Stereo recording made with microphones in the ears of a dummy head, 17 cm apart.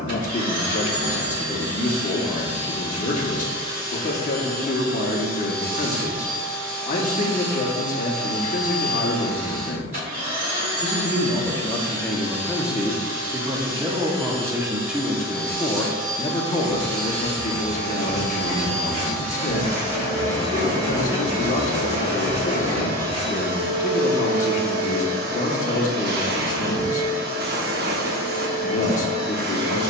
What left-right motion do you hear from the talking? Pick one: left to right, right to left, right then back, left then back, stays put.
right then back.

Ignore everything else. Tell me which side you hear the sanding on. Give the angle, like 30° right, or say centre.
30° right.